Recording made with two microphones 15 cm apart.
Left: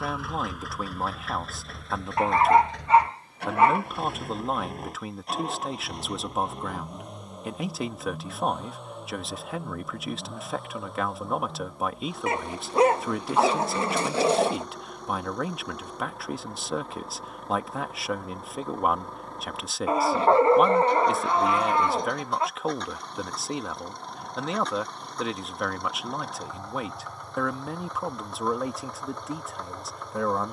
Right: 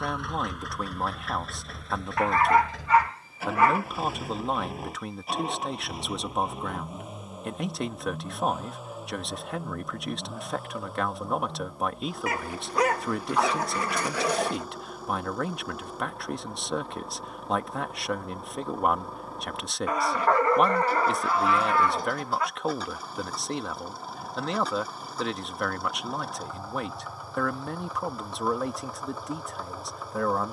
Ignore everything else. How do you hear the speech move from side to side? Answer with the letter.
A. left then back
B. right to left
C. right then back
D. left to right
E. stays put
E.